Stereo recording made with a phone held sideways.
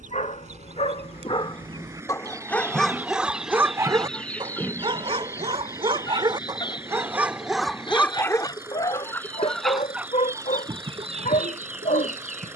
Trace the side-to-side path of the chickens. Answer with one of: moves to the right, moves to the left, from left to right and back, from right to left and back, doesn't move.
from right to left and back.